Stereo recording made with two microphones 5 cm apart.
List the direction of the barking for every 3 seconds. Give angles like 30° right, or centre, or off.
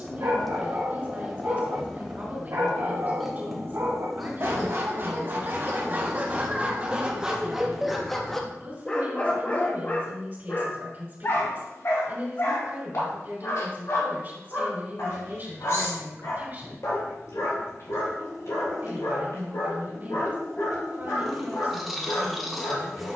70° right, 50° right, 10° right, 40° left, 60° left, 70° left, 80° left, 80° left.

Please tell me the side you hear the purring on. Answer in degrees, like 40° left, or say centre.
centre.